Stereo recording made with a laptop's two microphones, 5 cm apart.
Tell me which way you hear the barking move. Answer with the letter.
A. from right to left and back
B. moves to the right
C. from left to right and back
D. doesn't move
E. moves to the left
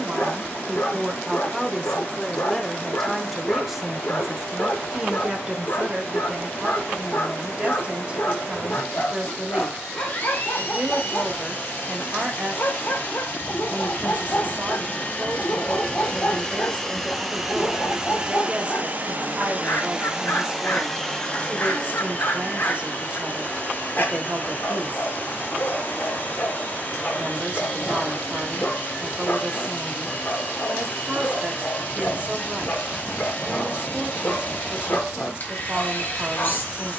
D.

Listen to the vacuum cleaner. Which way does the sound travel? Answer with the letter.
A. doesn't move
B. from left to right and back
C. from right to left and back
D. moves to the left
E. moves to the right
B.